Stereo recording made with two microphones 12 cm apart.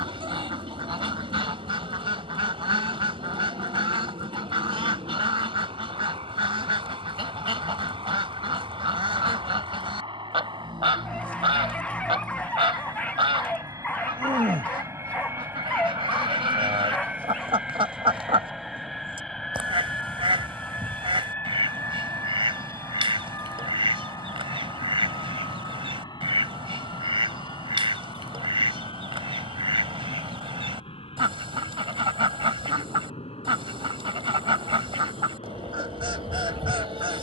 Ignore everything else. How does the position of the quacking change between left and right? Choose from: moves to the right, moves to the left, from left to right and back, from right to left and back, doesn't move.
doesn't move.